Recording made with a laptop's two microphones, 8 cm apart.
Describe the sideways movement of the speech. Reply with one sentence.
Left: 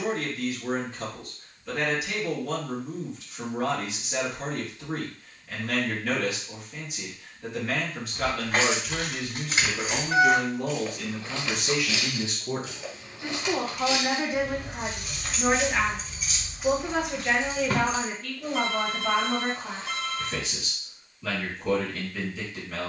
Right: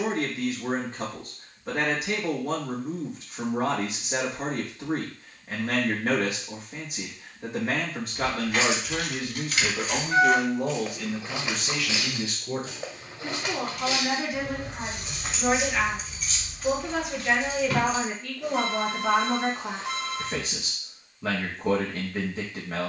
You can hear the speech go left and come back.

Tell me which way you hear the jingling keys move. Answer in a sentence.
You can hear the jingling keys move from left to right and back again.